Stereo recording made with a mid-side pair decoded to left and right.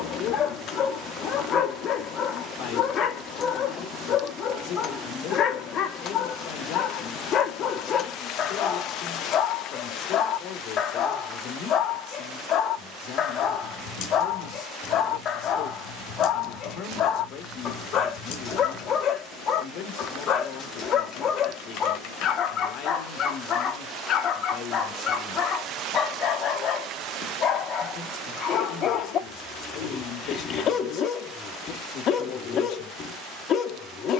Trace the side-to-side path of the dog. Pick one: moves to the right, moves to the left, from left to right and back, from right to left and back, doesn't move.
doesn't move.